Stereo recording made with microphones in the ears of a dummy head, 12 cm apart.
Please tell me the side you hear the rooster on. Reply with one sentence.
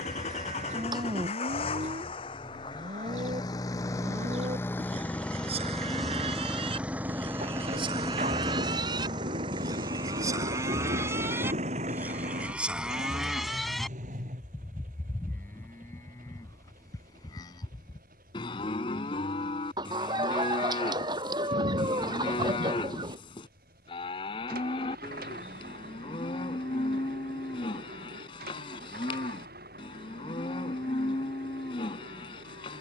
In this clip you hear the rooster on the right.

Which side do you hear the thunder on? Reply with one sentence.
You can hear the thunder on the right.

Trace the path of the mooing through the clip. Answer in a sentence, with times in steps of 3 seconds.
In this clip you hear the mooing on the right from 0 s, in the centre from 12 s and on the left from 15 s.